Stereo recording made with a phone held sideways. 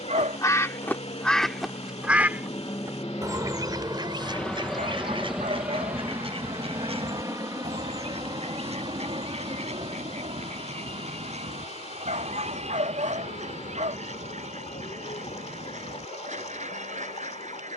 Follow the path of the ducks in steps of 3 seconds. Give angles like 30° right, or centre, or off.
10° left, 40° right, 50° right, 50° right, 60° right, 60° right.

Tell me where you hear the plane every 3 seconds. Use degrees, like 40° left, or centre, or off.
40° left, 10° left, 20° right, 40° right, 50° right, 50° right.